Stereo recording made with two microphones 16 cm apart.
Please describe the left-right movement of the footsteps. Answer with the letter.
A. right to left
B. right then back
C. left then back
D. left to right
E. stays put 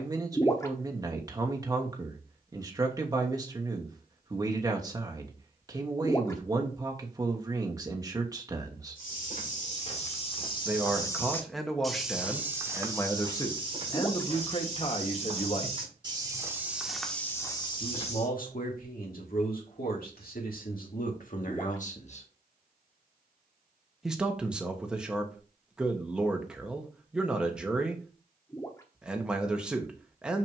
B.